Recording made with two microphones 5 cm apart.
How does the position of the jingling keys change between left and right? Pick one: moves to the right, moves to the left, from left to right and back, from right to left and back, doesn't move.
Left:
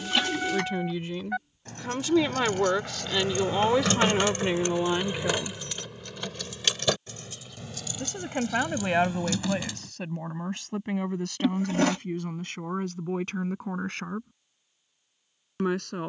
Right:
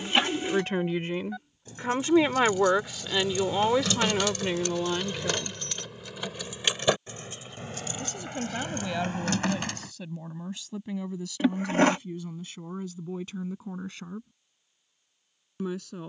moves to the right.